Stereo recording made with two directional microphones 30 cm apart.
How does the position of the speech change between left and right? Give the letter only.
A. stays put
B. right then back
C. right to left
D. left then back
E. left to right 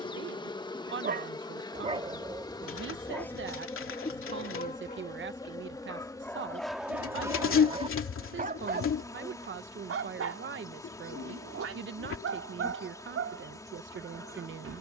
A.